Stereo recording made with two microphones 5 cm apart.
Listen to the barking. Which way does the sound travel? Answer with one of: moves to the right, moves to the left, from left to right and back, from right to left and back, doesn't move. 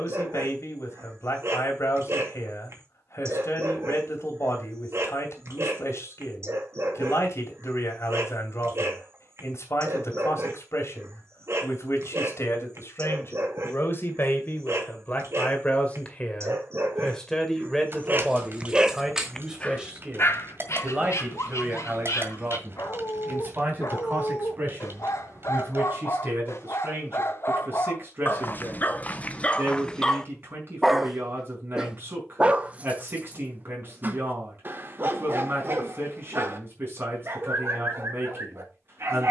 from right to left and back.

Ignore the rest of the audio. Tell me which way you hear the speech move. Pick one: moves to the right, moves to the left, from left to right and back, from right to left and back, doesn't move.
moves to the right.